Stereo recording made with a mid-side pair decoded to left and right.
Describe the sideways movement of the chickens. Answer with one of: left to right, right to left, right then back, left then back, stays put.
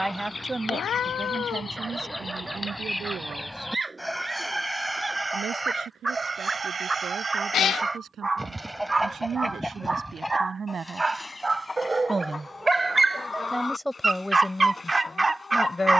right then back.